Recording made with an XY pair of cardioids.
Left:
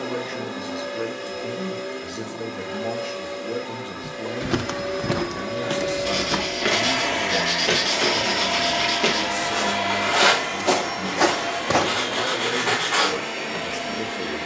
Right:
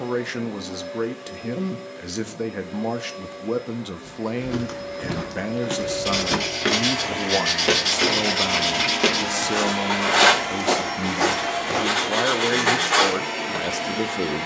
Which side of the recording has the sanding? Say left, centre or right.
right.